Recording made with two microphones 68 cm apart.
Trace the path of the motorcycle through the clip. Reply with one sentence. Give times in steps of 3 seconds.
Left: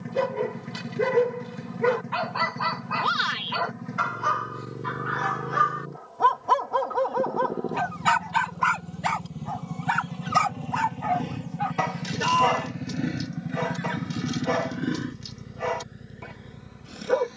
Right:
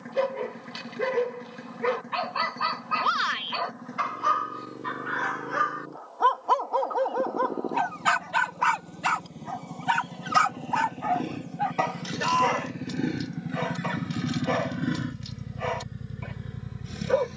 In this clip you hear the motorcycle on the left from 0 s, in the centre from 12 s and on the right from 15 s.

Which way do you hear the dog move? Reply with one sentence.
You can hear the dog move from left to right and back again.